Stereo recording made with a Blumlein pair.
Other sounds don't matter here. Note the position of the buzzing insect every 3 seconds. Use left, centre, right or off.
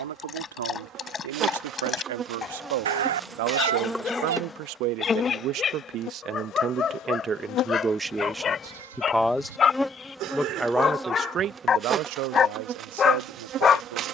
right, centre, left, centre, right.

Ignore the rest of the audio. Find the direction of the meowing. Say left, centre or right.
right.